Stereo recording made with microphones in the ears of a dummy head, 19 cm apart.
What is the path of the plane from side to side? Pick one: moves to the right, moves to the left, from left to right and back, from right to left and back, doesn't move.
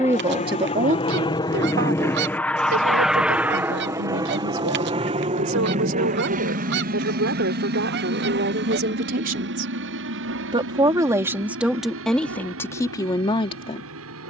moves to the right.